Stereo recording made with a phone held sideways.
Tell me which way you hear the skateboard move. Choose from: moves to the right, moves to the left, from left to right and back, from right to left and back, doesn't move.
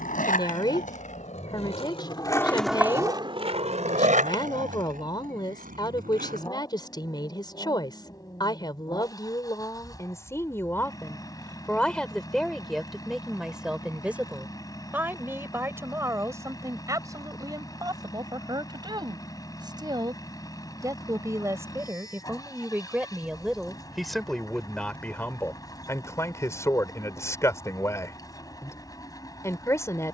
moves to the right.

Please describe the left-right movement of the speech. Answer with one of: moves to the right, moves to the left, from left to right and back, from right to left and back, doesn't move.
from left to right and back.